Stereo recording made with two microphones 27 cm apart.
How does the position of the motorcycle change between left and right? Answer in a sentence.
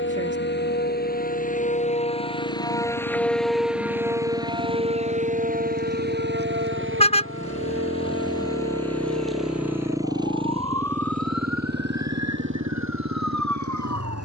You can hear the motorcycle move to the right.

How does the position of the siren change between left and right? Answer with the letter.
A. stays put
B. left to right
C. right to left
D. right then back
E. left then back
B.